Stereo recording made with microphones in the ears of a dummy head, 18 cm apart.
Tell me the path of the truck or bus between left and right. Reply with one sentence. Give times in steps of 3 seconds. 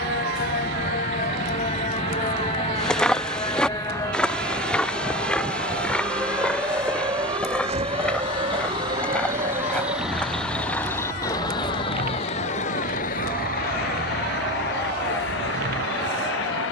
In this clip you hear the truck or bus on the right from 0 s, in the centre from 9 s and on the left from 12 s.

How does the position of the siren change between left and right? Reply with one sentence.
In this clip you hear the siren move from left to right.